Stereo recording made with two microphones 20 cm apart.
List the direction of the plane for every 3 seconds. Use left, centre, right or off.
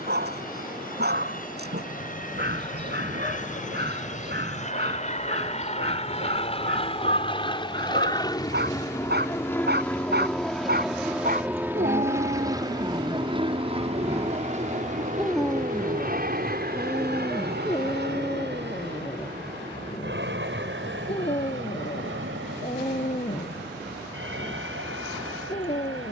left, left, left, centre, right, right, right, right, right.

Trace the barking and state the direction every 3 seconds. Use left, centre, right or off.
right, right, right, right, right, centre, left, left, left.